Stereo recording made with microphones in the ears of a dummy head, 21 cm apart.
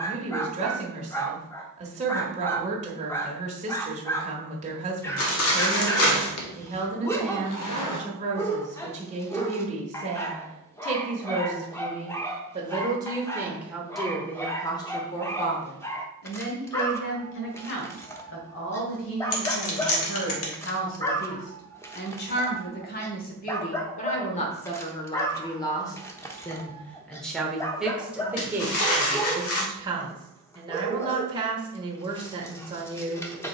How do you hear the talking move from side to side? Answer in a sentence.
You can hear the talking move from right to left and back again.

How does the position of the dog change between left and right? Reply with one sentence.
You can hear the dog stay in one place.